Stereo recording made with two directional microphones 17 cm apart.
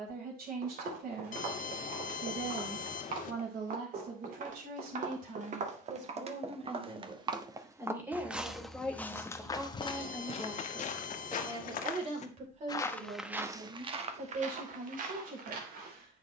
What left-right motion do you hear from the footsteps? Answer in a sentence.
In this clip you hear the footsteps move from right to left and back again.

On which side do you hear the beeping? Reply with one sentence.
You can hear the beeping on the left.